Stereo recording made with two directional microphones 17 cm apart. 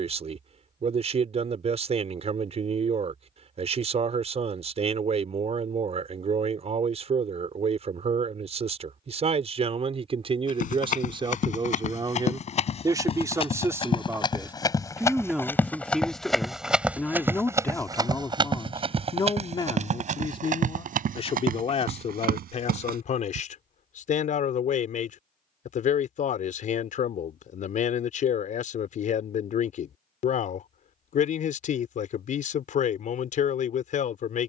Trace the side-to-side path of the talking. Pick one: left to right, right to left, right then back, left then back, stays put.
right to left.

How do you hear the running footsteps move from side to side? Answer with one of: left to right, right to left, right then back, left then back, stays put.
left to right.